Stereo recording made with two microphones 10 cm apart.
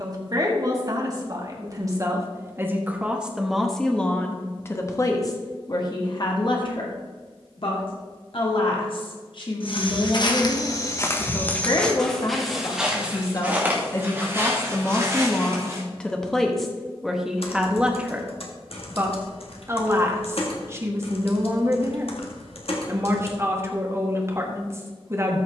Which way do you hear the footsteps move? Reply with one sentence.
You can hear the footsteps move from left to right.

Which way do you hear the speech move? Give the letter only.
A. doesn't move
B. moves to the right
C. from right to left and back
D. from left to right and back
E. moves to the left
C.